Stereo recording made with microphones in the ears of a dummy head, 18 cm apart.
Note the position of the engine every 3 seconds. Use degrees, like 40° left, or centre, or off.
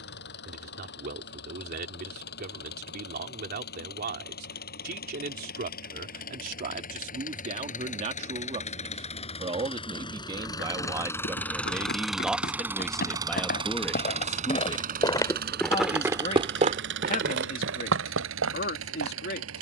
60° left, 50° left, 40° left, 20° left, 20° right, 60° right, 80° right.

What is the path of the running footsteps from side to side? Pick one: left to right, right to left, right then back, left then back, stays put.
left to right.